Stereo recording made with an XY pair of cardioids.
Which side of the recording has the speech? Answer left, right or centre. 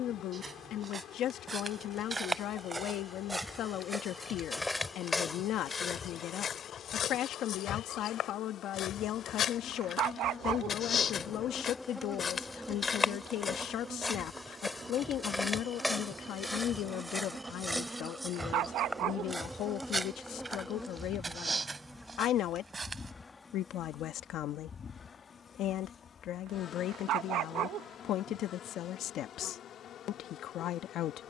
left.